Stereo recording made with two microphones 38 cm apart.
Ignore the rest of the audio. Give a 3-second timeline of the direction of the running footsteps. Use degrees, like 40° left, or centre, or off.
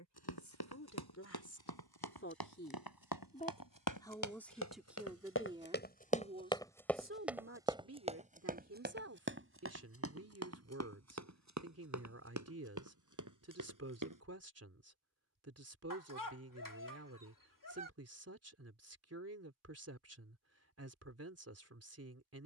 70° left, 50° left, 10° right, 40° right, 50° right, off, off, off.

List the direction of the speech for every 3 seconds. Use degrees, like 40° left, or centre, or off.
40° left, centre, 30° right, 40° right, 40° right, 40° right, 40° right, 40° right.